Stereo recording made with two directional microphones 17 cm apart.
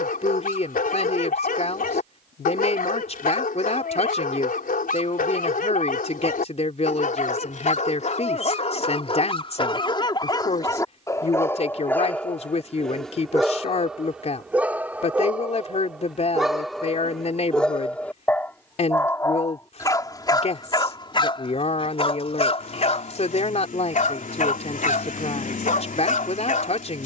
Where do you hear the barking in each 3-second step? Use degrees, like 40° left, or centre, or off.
50° left, 50° left, 50° left, 20° left, centre, centre, 20° left, 40° left, 50° left.